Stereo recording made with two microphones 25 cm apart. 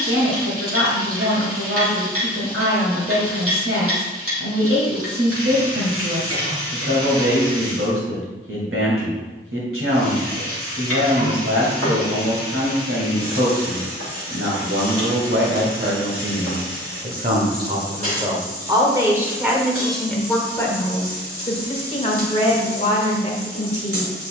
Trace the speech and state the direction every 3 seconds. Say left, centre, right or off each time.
right, right, right, right, right, right, centre, left.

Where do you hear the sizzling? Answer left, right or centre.
right.